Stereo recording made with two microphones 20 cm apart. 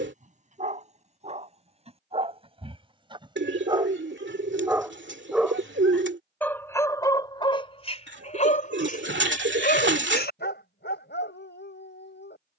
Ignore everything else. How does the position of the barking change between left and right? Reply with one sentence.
You can hear the barking go from the right side to the left.